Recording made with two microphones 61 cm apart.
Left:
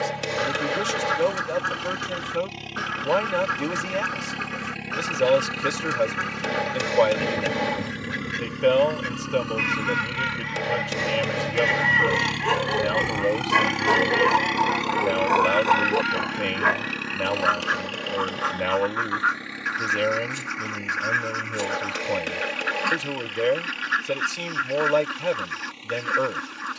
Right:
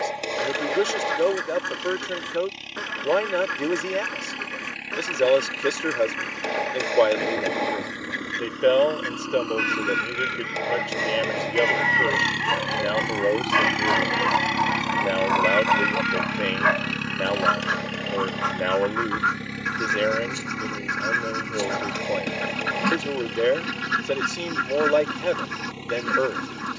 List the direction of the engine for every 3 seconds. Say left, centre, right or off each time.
left, left, left, left, centre, right, right, right, right.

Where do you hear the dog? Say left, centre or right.
left.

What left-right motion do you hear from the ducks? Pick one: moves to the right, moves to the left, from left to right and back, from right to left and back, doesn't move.
moves to the right.